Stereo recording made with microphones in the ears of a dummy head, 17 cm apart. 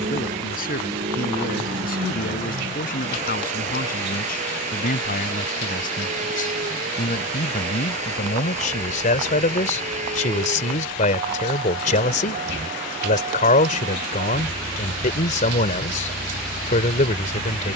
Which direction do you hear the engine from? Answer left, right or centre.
right.